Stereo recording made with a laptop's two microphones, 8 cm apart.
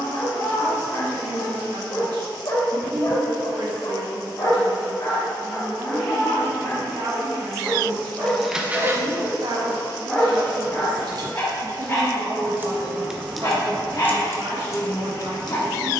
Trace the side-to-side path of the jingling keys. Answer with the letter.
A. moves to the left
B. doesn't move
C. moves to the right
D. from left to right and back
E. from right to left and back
D.